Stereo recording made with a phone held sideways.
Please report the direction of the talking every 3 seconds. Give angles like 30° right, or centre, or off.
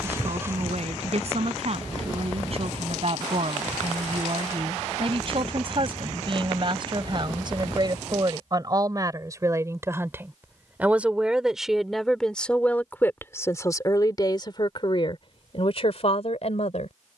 50° right, 50° right, 40° right, 10° right, 20° left, 50° left.